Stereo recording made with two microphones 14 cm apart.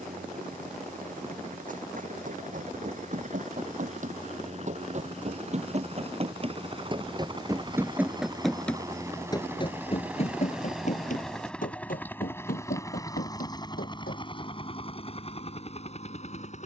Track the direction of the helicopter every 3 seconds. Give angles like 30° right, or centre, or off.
60° right, 50° right, 30° right, 10° right, 30° left, 40° left.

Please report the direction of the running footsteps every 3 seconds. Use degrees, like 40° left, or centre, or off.
60° right, 50° right, 20° right, 50° left, 70° left, off.